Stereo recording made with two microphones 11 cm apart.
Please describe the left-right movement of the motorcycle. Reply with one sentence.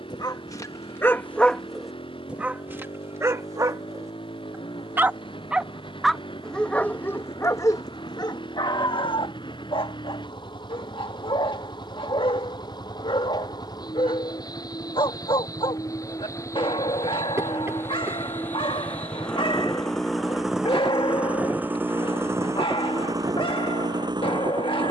In this clip you hear the motorcycle travel towards the right.